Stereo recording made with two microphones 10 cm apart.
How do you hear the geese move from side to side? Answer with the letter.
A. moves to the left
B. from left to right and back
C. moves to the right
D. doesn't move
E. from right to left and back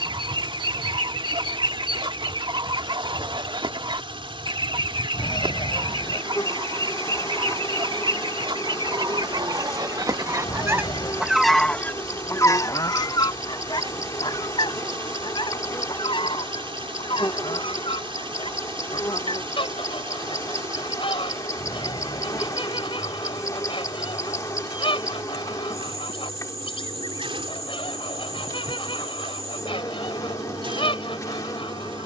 A.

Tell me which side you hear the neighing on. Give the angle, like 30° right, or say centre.
60° left.